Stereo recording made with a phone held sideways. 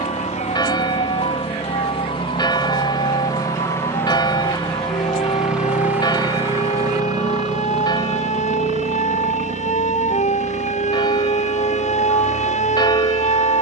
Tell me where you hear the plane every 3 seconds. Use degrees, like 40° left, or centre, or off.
40° left, 10° left, 30° right, 50° right, 60° right.